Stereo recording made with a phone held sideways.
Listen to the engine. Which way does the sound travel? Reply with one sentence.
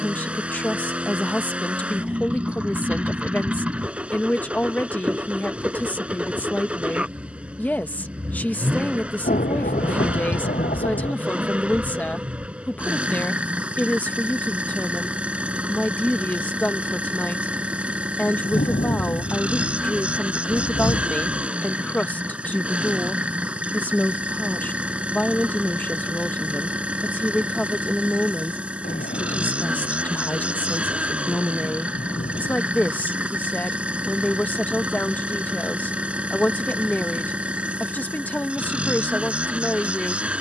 In this clip you hear the engine stay in one place.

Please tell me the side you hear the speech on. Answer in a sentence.
In this clip you hear the speech in the centre.